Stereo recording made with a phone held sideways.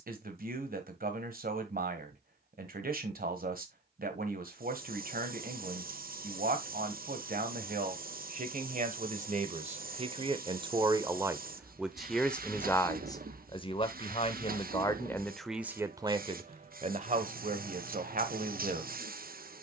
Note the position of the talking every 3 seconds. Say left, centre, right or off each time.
right, right, right, right, left, right, right.